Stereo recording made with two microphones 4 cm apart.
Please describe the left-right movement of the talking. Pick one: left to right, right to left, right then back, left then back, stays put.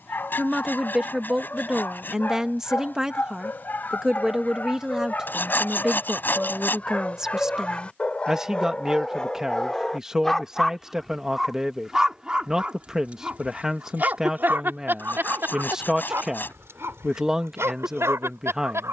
stays put.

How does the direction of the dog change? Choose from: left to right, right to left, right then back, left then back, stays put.
left to right.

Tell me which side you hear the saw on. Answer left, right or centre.
left.